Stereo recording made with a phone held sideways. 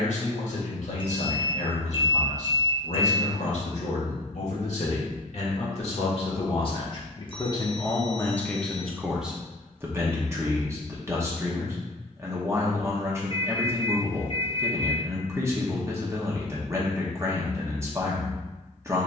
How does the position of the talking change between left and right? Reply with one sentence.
In this clip you hear the talking move from left to right.